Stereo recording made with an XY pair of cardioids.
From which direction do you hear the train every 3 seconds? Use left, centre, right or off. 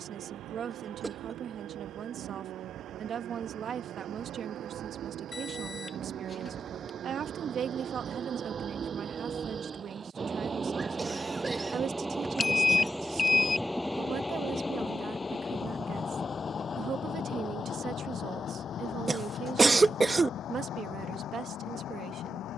right, right, right, right, centre, left, left, left.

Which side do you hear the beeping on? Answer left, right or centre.
left.